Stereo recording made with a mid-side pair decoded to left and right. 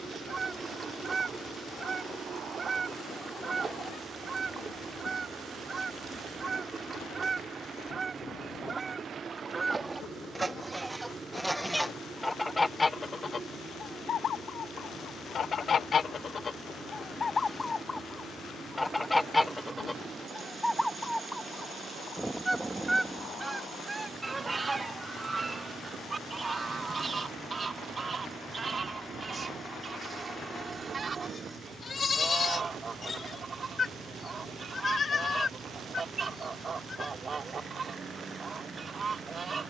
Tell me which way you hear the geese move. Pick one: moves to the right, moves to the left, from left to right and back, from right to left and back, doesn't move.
from right to left and back.